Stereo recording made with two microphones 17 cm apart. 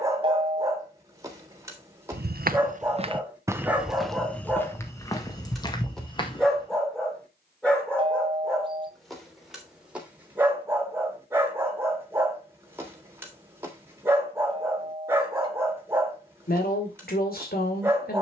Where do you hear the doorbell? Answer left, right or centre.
right.